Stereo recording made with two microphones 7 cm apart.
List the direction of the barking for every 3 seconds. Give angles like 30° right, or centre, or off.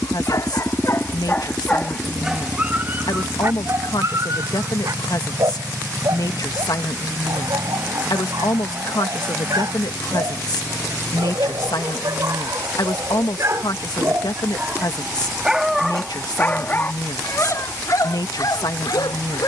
20° left, 50° right, 60° right, 60° right, 40° right, 20° left, 60° left.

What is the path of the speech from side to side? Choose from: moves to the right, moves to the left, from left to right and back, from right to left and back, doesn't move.
doesn't move.